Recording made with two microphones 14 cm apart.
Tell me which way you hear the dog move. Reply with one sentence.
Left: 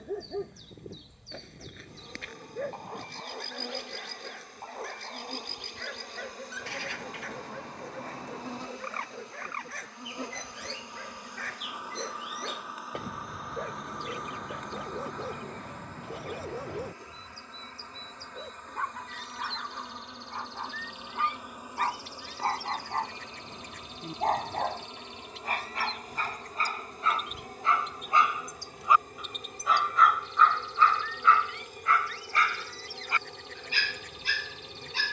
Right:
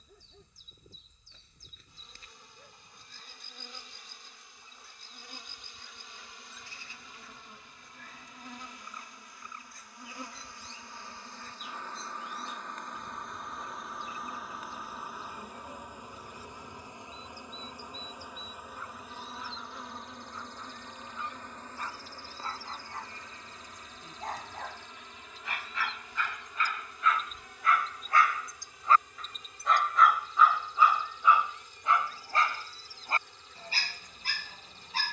In this clip you hear the dog move to the right.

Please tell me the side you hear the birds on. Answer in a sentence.
In this clip you hear the birds on the left.